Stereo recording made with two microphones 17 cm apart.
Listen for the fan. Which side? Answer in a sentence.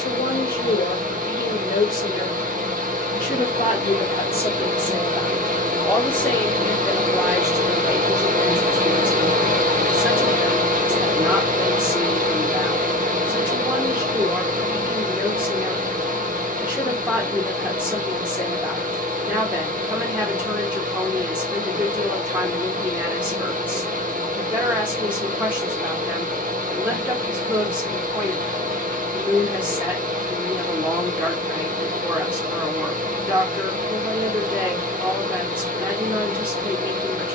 You can hear the fan on the right.